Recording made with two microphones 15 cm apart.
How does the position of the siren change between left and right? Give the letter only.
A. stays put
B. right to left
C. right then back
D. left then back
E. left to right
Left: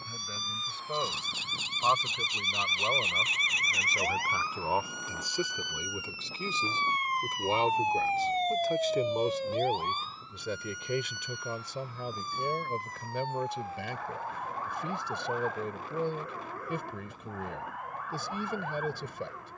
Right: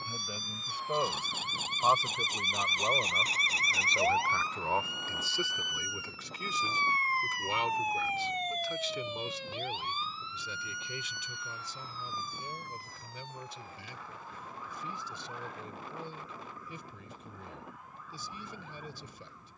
B.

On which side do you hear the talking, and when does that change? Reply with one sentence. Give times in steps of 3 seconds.
You can hear the talking in the centre from 0 s and on the left from 6 s.